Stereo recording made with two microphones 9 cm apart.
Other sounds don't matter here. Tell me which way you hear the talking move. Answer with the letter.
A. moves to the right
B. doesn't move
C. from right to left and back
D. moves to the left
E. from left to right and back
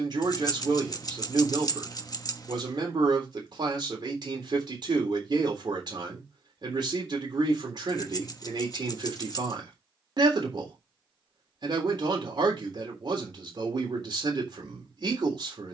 B.